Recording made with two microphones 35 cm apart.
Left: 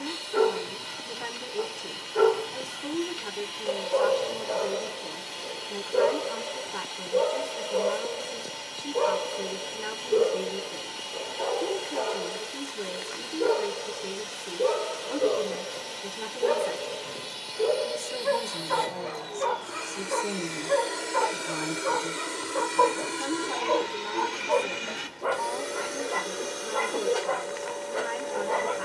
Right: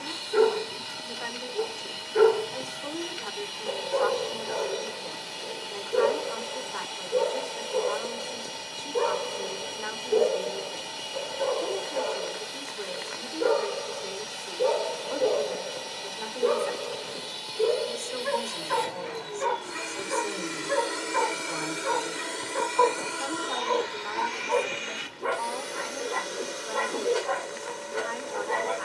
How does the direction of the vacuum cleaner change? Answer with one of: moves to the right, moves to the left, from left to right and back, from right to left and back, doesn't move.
moves to the left.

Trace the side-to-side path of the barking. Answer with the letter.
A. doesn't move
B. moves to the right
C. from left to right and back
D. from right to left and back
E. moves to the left
D.